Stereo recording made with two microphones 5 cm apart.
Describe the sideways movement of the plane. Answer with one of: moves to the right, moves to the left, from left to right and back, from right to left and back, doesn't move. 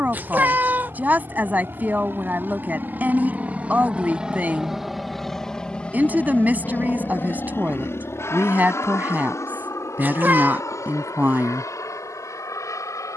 moves to the left.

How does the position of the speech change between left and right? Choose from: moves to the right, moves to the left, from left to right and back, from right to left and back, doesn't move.
doesn't move.